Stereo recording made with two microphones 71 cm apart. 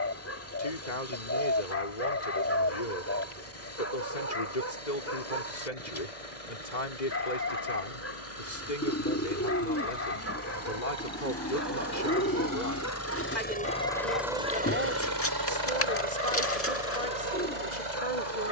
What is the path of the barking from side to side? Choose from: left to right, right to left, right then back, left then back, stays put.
stays put.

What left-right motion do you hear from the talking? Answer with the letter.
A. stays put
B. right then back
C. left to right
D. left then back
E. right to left
A.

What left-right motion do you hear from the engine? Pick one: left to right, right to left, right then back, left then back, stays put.
left to right.